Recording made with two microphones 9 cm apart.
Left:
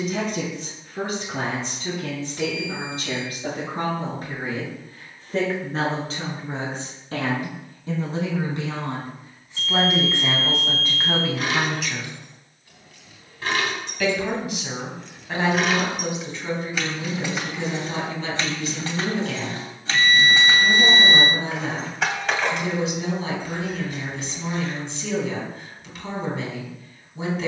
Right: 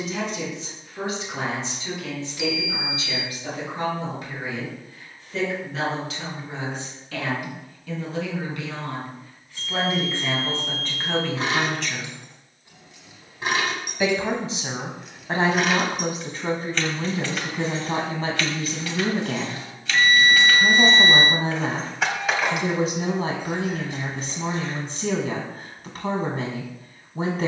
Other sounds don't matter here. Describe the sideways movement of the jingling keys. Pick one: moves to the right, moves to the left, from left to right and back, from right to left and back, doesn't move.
from right to left and back.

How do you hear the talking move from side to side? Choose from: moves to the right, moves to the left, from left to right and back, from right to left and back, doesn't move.
moves to the right.